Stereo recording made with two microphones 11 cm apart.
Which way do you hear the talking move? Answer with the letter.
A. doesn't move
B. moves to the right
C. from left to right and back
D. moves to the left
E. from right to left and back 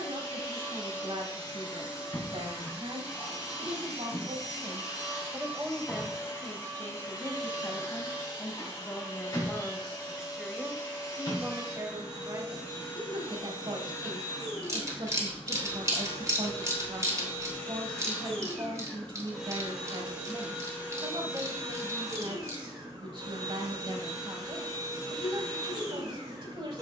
E.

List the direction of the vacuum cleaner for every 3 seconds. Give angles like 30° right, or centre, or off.
30° left, 30° left, 30° left, 30° left, 30° left, 20° left, centre, 30° right, 40° right.